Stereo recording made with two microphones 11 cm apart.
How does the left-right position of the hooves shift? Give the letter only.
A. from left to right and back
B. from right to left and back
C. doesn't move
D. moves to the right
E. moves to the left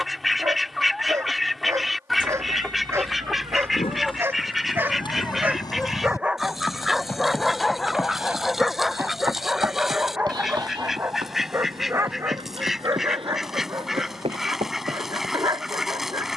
D.